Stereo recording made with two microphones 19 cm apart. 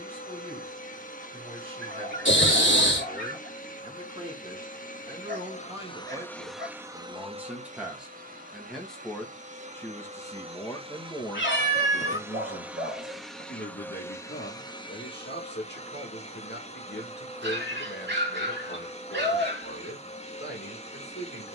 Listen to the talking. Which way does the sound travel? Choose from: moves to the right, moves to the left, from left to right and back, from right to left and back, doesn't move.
moves to the left.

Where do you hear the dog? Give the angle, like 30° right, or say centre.
70° right.